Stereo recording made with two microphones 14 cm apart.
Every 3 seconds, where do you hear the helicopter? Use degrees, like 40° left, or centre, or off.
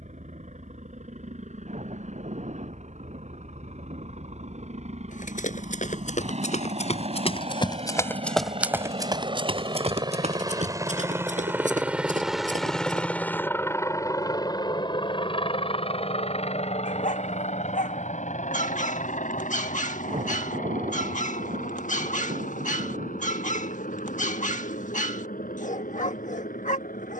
70° right, 60° right, 50° right, 30° right, 20° left, 50° left, 60° left, 70° left, 80° left.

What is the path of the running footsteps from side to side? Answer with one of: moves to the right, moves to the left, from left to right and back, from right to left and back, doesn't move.
moves to the right.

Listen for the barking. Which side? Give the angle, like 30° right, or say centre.
70° left.